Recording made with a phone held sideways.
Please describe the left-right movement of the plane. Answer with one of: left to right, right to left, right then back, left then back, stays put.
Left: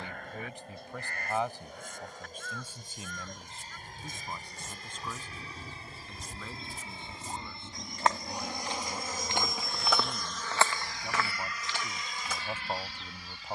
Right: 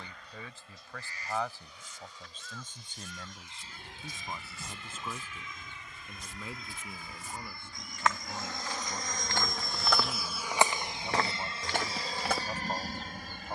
left to right.